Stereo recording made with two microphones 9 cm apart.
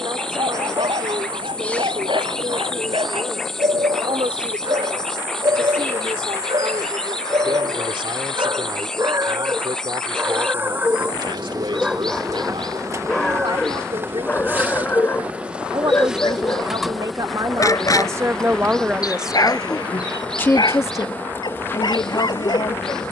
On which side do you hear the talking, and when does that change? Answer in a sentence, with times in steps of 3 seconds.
You can hear the talking on the right from 0 s, in the centre from 18 s and on the left from 21 s.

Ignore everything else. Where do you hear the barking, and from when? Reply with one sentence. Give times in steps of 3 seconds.
In this clip you hear the barking on the right from 0 s, in the centre from 12 s and on the left from 15 s.